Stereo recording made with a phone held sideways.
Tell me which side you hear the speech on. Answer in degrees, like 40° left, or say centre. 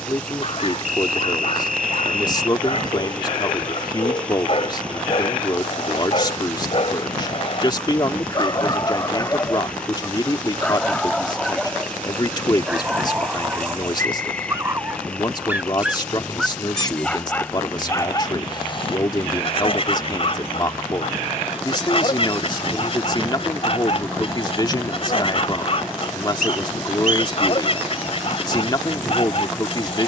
30° left.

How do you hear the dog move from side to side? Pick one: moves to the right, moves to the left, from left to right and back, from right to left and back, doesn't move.
from left to right and back.